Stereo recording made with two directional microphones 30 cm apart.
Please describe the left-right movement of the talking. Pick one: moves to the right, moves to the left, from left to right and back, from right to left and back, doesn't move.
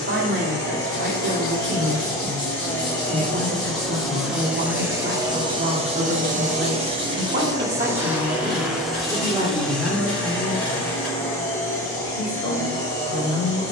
moves to the left.